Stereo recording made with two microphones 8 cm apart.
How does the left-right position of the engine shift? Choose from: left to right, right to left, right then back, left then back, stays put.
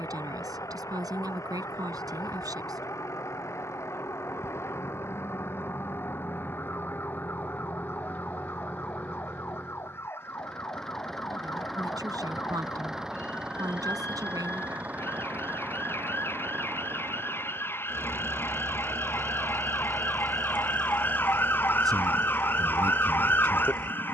left to right.